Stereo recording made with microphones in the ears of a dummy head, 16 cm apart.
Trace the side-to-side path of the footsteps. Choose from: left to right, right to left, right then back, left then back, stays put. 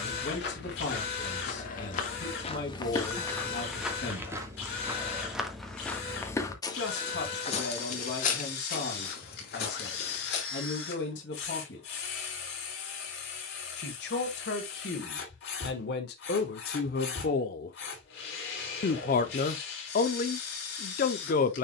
right then back.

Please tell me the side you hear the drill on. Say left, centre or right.
left.